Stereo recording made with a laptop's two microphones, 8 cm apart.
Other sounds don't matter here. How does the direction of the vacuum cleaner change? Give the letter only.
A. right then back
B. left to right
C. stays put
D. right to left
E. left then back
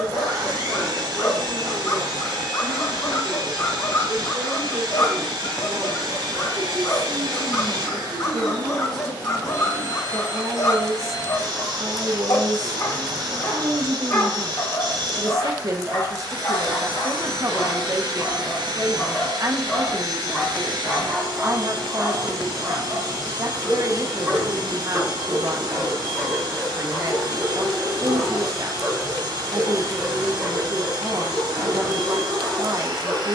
C.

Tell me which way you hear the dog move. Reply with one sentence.
In this clip you hear the dog go from the left side to the right.